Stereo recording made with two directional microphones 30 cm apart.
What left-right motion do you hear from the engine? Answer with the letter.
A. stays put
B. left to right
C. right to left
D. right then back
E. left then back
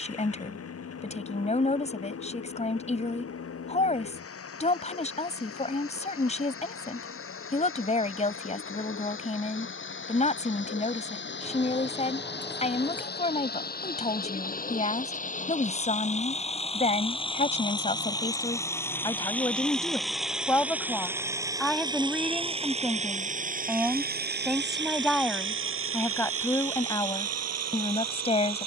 B.